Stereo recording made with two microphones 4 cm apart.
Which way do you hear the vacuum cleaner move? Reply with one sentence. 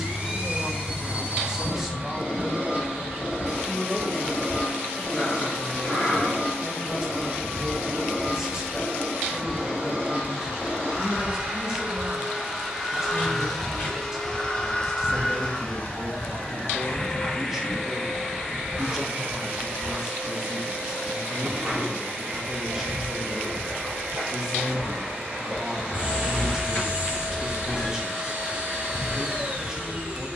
In this clip you hear the vacuum cleaner move from right to left and back again.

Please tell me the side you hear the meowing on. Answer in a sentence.
You can hear the meowing on the left.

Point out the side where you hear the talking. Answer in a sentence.
In this clip you hear the talking in the centre.